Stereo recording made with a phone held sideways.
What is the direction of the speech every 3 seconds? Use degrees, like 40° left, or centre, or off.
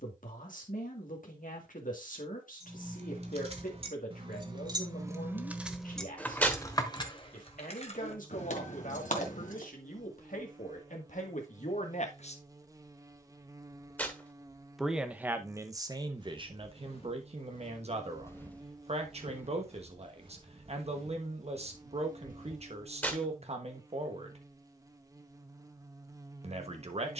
70° left, 70° left, 70° left, 70° left, 30° left, 30° right, 50° right, 50° right, 50° right.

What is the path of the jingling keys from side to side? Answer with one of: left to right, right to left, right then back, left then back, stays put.
right to left.